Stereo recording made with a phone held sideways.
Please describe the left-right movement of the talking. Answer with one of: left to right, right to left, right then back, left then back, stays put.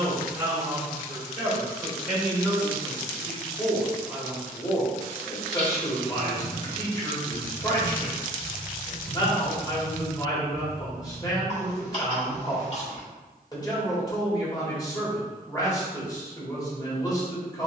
right to left.